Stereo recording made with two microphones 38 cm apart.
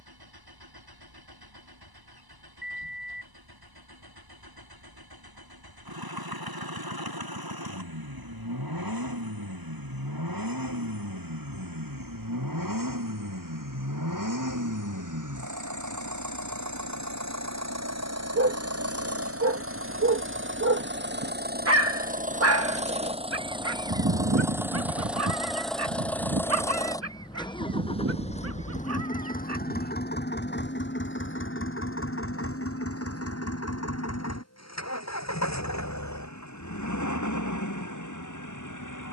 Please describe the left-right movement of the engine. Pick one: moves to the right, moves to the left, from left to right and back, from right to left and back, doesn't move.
moves to the left.